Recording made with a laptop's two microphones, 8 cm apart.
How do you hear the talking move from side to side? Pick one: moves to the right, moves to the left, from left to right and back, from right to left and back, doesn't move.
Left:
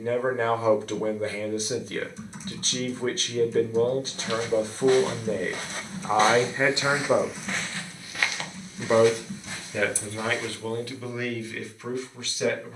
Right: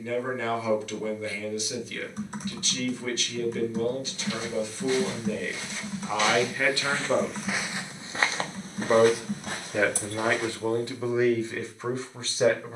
moves to the right.